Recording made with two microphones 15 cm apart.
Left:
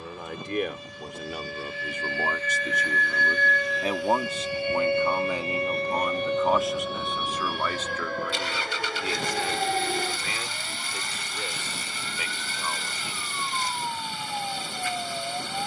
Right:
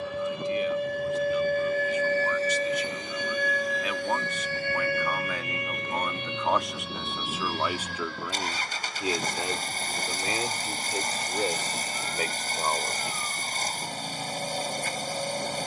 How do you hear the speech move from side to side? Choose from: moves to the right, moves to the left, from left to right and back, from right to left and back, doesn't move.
moves to the right.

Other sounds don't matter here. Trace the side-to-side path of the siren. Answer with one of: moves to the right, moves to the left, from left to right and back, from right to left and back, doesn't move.
moves to the left.